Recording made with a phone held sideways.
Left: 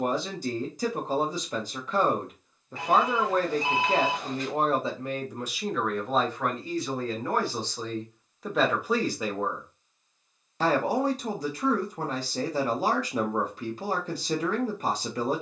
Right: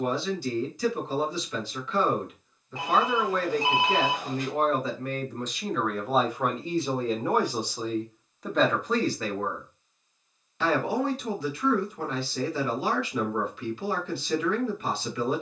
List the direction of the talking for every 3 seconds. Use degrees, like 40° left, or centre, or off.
40° left, 30° left, 10° right, 30° left, 40° left.